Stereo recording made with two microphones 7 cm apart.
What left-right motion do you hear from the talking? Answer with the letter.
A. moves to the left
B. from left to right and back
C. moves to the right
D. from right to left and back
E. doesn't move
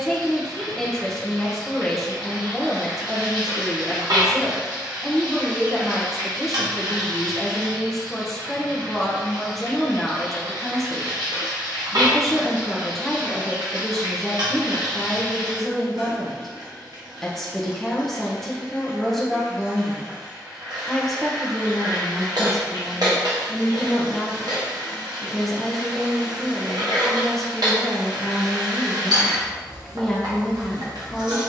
E.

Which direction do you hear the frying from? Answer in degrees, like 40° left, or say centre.
60° right.